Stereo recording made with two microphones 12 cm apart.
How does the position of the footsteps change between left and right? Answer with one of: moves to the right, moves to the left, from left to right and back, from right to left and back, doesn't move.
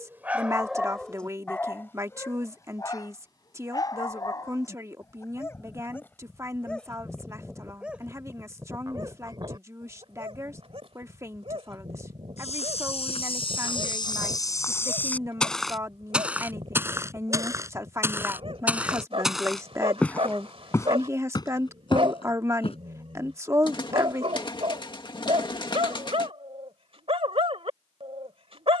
from left to right and back.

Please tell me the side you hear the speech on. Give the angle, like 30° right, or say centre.
20° right.